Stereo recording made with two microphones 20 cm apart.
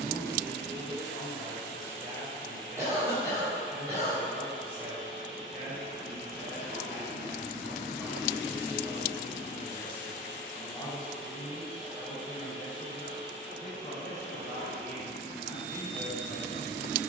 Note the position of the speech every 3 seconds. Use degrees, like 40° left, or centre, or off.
50° right, 50° right, 20° right, 10° left, 40° left, 50° left.